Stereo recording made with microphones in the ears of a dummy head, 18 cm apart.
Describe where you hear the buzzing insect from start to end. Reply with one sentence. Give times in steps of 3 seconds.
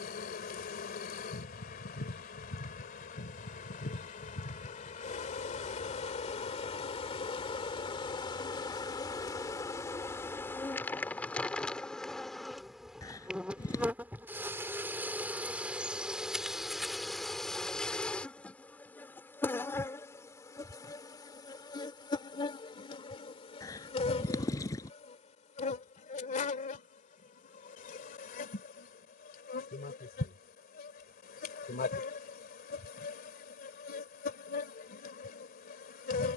In this clip you hear the buzzing insect on the left from 0 s, in the centre from 9 s and on the left from 21 s.